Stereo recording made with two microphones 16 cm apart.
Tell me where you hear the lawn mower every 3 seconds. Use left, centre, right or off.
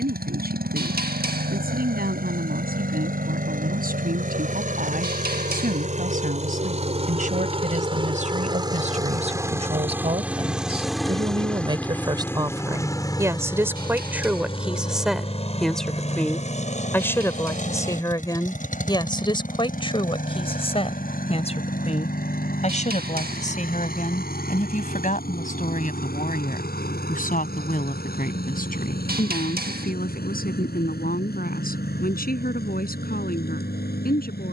right, right, right, centre, left, left, left, left, left, left, left, left.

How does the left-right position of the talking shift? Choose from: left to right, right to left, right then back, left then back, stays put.
right to left.